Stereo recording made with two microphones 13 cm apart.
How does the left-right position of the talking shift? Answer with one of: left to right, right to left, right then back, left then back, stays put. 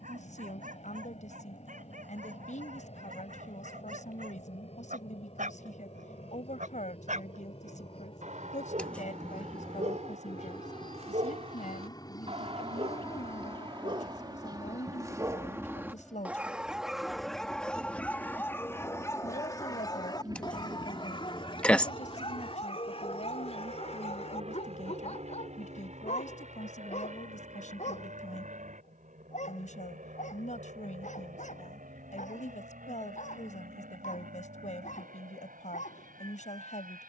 stays put.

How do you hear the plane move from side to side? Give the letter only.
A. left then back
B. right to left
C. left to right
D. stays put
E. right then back
C.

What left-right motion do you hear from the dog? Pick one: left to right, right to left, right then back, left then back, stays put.
right to left.